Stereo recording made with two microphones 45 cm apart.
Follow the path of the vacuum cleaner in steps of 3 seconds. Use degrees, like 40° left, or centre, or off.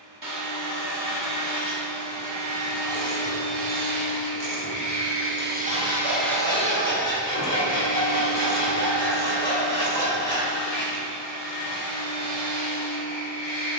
70° right, 40° right, 30° left, 60° left, 70° left.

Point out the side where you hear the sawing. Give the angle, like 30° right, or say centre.
30° left.